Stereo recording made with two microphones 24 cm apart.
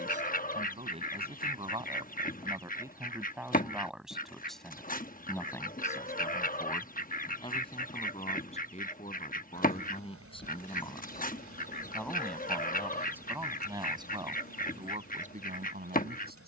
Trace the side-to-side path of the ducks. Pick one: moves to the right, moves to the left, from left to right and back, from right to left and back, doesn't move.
doesn't move.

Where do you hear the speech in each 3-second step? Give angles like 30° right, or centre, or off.
20° right, centre, 20° left, 20° left, 10° right, 40° right.